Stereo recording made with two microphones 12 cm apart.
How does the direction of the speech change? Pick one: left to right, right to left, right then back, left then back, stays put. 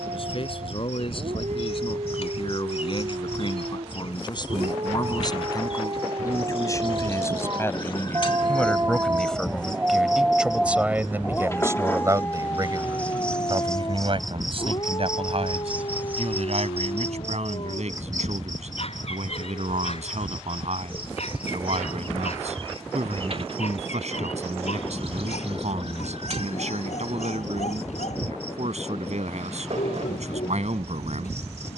left to right.